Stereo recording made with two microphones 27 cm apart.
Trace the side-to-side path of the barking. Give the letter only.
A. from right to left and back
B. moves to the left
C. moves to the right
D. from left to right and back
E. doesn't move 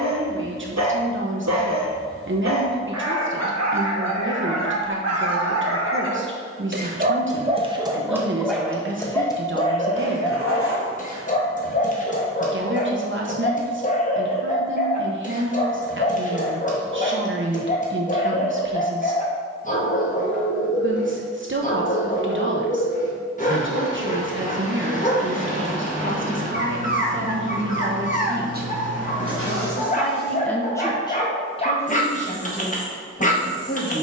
B.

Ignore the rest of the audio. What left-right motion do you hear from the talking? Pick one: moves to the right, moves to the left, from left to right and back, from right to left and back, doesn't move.
moves to the left.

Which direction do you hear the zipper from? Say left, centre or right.
right.